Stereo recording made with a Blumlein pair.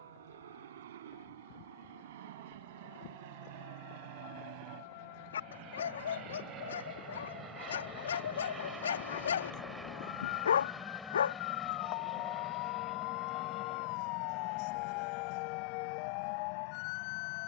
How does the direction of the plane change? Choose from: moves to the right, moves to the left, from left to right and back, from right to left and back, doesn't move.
moves to the left.